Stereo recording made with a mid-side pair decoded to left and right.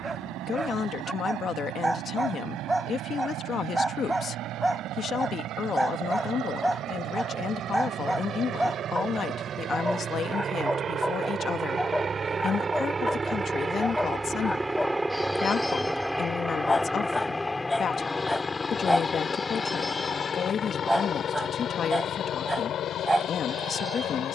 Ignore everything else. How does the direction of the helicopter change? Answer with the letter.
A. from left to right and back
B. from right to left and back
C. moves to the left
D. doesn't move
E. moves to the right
C.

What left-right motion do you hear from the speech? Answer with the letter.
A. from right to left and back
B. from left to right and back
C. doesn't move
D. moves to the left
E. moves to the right
C.